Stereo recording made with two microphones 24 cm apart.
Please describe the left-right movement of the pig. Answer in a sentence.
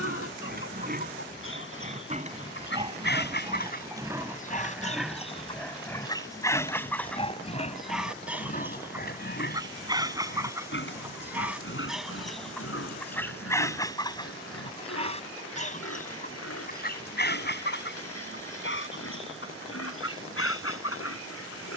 You can hear the pig move to the left.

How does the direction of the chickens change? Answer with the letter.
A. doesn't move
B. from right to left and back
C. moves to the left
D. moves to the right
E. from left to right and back
E.